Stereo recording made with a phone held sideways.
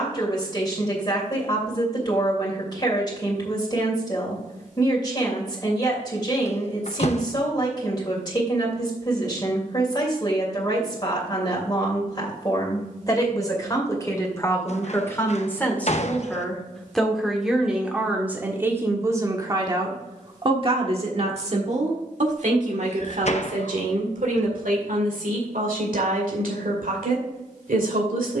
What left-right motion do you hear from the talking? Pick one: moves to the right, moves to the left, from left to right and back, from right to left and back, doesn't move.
moves to the right.